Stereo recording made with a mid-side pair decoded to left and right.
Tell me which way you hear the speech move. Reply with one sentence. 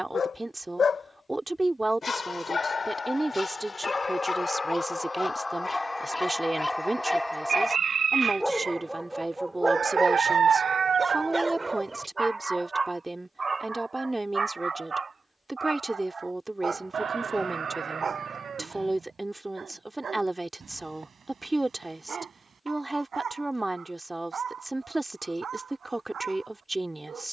In this clip you hear the speech stay in one place.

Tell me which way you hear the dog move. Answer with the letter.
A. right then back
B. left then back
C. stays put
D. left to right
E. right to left
D.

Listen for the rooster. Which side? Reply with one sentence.
In this clip you hear the rooster on the right.